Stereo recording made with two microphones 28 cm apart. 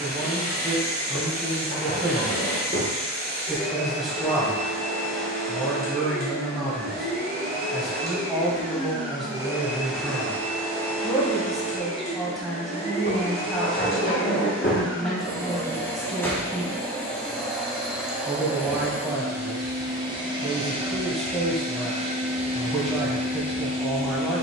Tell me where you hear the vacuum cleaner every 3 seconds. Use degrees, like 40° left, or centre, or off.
30° right, 30° right, 30° right, 10° left, 20° left, 10° left, 10° right, 20° right.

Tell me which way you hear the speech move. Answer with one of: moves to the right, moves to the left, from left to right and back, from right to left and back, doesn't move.
doesn't move.